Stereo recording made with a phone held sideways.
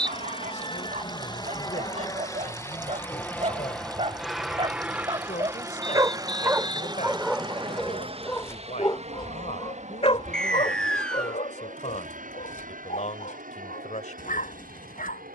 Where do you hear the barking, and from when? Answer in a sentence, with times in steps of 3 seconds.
In this clip you hear the barking on the right from 0 s, in the centre from 6 s and on the left from 9 s.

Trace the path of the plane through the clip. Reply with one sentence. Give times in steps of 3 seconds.
You can hear the plane on the left from 0 s, in the centre from 3 s and on the right from 6 s.